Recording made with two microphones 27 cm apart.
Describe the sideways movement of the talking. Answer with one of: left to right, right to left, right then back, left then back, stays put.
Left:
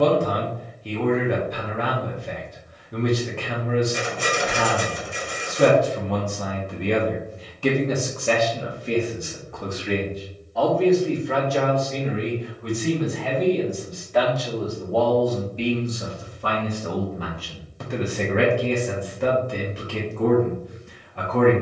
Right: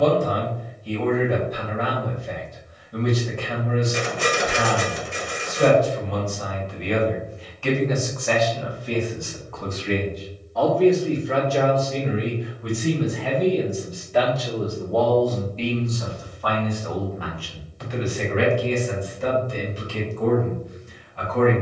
right then back.